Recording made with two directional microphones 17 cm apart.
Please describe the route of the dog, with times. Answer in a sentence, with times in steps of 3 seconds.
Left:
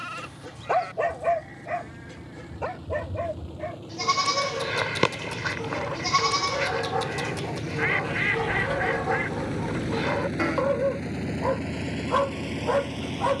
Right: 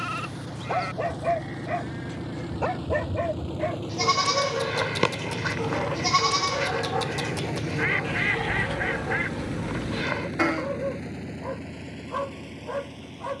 In this clip you hear the dog in the centre from 0 s, on the right from 3 s, in the centre from 6 s and on the left from 9 s.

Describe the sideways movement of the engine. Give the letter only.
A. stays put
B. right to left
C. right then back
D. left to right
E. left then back
B.